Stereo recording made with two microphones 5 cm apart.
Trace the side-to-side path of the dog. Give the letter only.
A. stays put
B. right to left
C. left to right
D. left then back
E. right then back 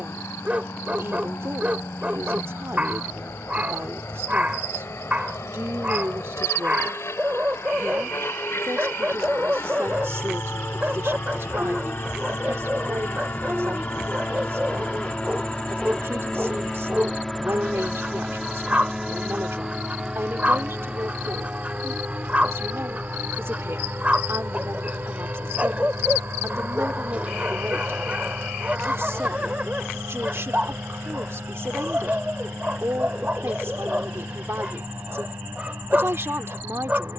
A.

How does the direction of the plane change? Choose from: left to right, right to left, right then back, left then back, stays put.
left to right.